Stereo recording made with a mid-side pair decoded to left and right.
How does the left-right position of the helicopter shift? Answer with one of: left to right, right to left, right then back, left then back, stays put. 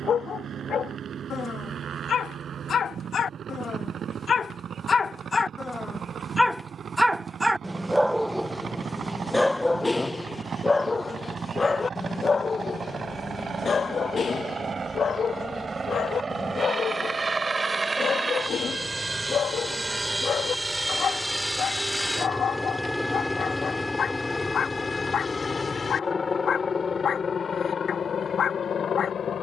right to left.